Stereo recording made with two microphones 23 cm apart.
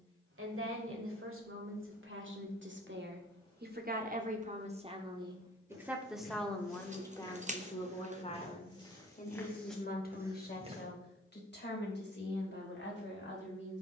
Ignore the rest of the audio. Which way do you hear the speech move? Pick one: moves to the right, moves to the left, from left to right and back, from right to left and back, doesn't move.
moves to the left.